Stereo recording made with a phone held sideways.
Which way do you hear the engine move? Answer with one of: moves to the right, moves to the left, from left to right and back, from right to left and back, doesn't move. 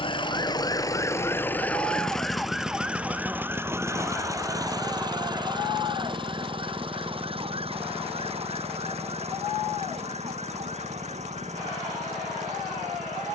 moves to the right.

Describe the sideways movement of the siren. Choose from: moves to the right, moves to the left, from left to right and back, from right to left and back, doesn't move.
moves to the right.